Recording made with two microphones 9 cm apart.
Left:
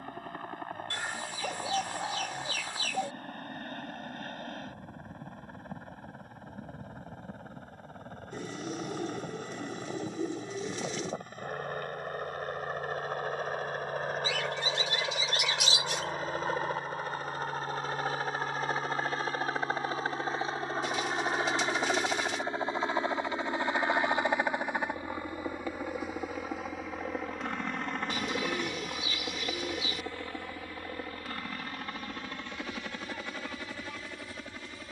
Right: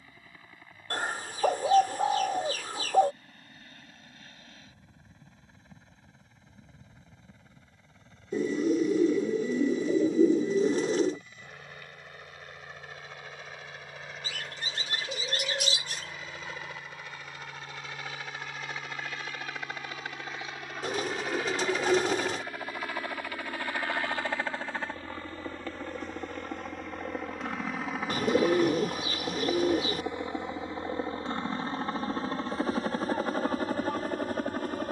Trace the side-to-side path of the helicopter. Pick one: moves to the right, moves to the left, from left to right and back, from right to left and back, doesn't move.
moves to the right.